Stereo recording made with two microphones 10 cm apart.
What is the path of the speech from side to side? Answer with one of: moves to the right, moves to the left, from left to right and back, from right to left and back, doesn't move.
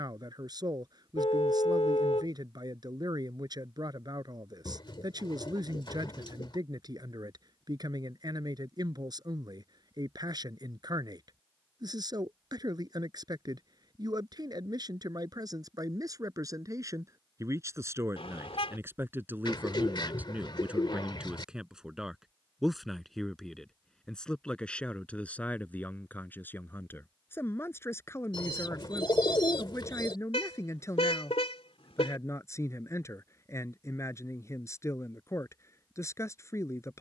moves to the left.